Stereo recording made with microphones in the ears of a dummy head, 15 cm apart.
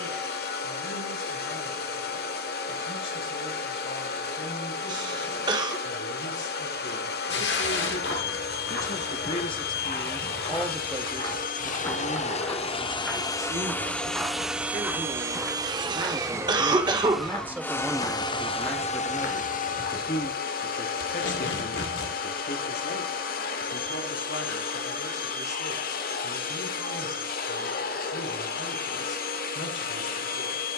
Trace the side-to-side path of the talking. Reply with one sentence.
In this clip you hear the talking go right and come back.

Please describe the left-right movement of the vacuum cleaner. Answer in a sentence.
In this clip you hear the vacuum cleaner move from left to right and back again.